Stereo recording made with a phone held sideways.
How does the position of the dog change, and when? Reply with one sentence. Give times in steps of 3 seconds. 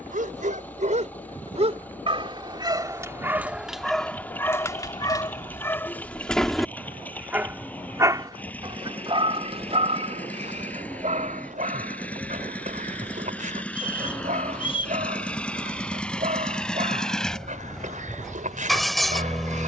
In this clip you hear the dog on the right from 0 s, in the centre from 3 s and on the right from 9 s.